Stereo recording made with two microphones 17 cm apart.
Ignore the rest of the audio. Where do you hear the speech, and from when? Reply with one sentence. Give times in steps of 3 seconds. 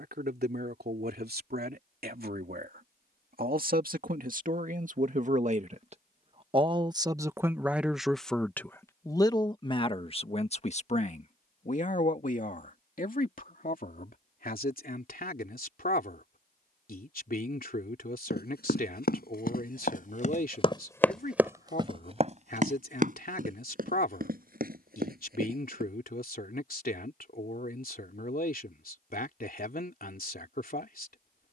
In this clip you hear the speech on the right from 0 s, in the centre from 6 s and on the left from 9 s.